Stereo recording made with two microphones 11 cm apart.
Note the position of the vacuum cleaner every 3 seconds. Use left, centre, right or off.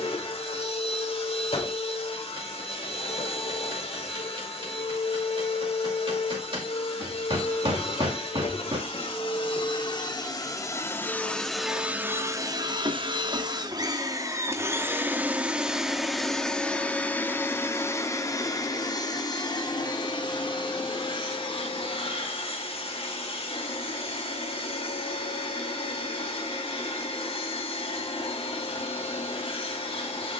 left, left, left, left, right, centre, left, left, left, left.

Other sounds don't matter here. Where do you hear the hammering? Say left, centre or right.
right.